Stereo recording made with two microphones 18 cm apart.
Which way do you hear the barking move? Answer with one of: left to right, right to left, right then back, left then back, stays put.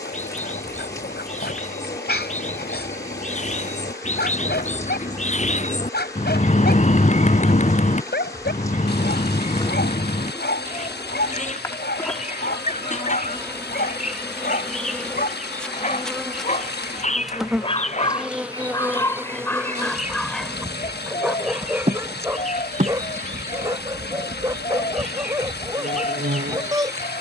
left to right.